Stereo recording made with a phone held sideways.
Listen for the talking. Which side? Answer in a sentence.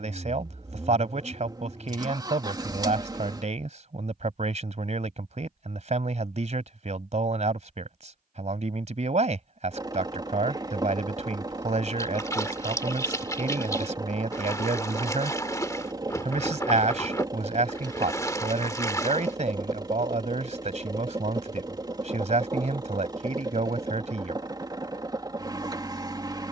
You can hear the talking on the right.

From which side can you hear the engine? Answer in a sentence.
In this clip you hear the engine on the right.